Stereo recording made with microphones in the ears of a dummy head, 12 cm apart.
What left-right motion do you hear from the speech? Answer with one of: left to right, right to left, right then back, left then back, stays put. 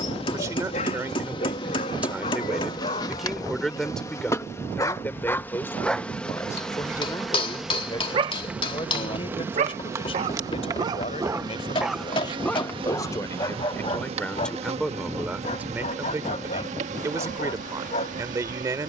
left then back.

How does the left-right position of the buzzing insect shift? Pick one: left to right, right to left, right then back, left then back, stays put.
left to right.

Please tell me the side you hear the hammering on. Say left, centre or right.
left.